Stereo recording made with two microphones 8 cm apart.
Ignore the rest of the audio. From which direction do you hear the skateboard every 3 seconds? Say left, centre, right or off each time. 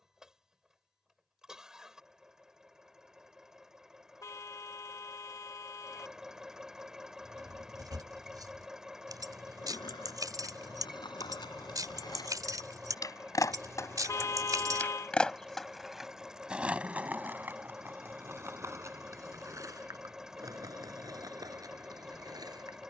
off, off, off, left, left, centre, right, right.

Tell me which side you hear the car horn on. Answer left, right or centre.
left.